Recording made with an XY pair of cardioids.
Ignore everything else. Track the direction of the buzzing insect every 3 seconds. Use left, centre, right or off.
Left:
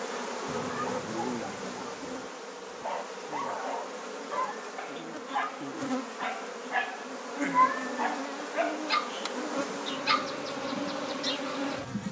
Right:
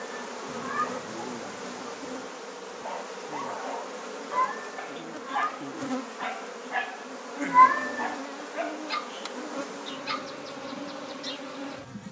centre, centre, centre, left.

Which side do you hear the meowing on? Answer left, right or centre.
right.